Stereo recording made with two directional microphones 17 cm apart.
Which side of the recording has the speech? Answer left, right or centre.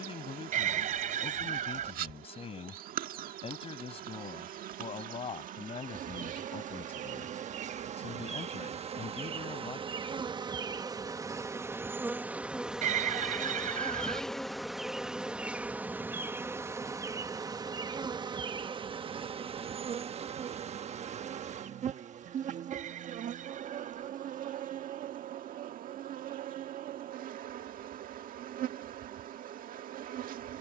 left.